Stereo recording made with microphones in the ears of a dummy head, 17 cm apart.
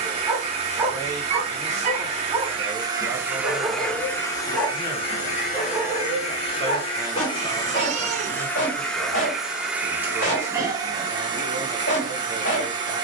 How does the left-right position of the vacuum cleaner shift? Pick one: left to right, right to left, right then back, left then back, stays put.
left then back.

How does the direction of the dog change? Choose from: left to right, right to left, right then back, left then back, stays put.
right to left.